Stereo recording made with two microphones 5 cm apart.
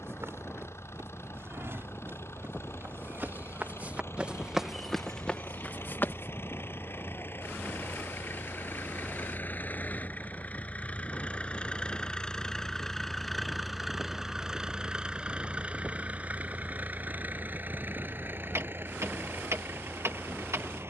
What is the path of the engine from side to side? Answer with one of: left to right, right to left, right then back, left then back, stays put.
left to right.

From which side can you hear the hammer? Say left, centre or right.
right.